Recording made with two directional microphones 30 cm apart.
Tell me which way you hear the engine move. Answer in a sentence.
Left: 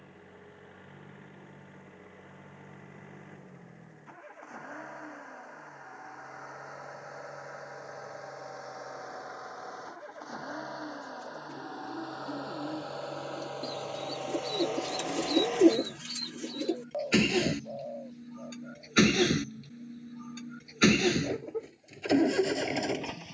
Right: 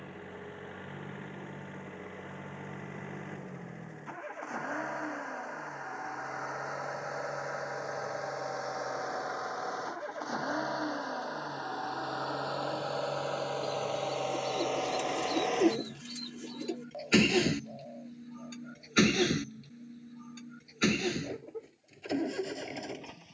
In this clip you hear the engine travel towards the left.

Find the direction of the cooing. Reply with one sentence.
You can hear the cooing on the left.